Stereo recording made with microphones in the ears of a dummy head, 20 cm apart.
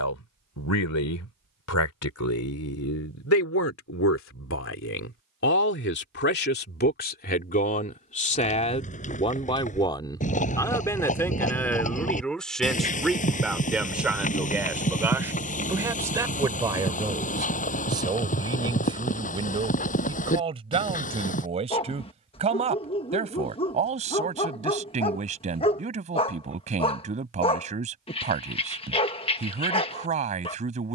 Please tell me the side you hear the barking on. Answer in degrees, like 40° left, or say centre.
20° left.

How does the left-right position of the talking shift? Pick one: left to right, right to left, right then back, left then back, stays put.
left to right.